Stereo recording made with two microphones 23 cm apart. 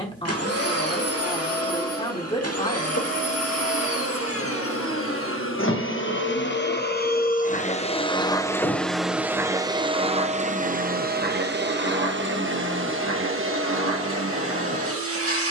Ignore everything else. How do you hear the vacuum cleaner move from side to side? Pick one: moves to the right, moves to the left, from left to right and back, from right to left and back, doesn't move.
moves to the right.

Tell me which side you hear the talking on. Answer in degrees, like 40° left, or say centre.
20° left.